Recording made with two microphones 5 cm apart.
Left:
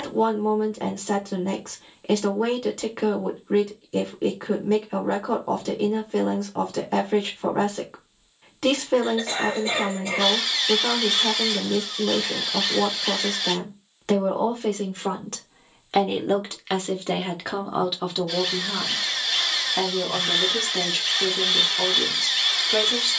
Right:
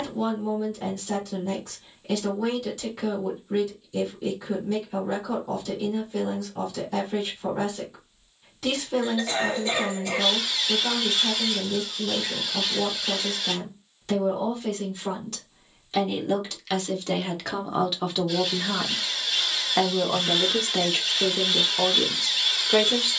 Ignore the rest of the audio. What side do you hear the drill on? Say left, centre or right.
left.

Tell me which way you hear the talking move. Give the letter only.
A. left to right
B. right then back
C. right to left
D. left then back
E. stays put
A.